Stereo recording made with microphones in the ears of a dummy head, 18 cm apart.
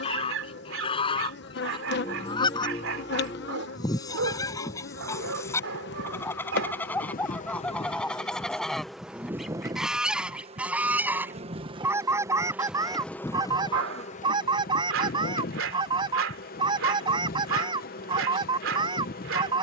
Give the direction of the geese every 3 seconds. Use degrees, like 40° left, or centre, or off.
20° left, 20° left, 10° left, 10° right, 20° right, 20° right, 20° right.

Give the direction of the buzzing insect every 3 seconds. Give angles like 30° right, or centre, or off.
50° left, 50° left, 30° left, 20° right, 20° left, 40° left, 40° left.